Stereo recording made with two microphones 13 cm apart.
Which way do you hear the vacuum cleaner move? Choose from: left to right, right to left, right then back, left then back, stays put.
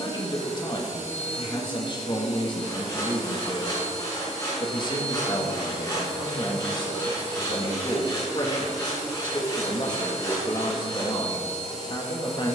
stays put.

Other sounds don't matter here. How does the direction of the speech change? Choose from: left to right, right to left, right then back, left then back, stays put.
stays put.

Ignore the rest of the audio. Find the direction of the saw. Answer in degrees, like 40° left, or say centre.
30° left.